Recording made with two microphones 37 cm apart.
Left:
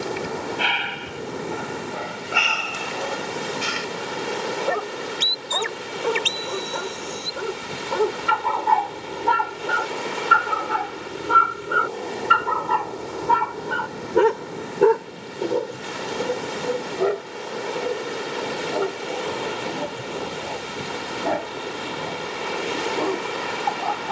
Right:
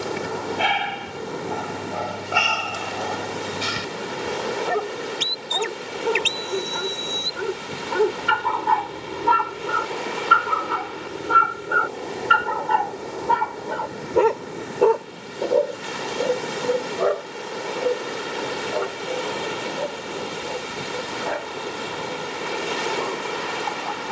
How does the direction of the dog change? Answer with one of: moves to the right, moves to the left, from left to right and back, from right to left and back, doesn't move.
moves to the left.